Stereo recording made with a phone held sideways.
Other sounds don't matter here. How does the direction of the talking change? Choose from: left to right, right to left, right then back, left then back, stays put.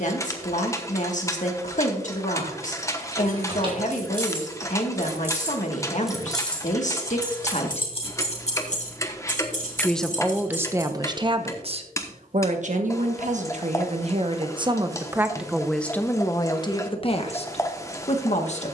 right then back.